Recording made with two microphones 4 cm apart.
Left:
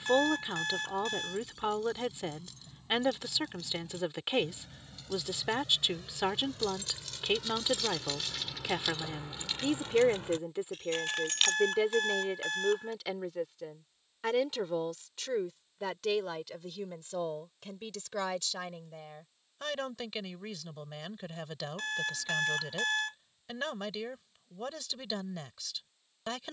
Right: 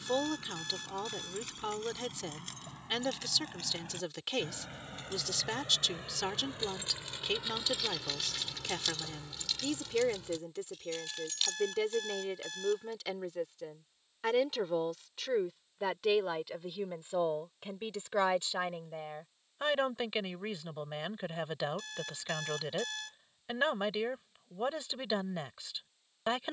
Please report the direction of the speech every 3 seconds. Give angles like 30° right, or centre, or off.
20° left, 20° left, 20° left, 20° left, 10° left, 10° right, 20° right, 20° right, 20° right.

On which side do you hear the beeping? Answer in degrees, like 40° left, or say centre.
50° left.